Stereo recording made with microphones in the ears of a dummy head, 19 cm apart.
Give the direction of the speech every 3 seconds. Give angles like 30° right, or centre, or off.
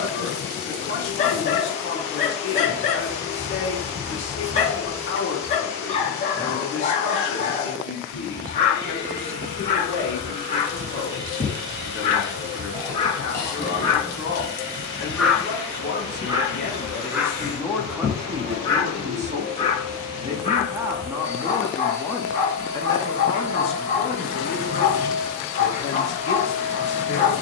60° left, 60° left, 60° left, 60° left, 60° left, 40° left, 20° right, 10° left, 40° left.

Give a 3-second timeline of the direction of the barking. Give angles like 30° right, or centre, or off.
30° left, 30° left, 30° left, 30° left, 20° left, 10° right, 20° left, 30° left, 30° left.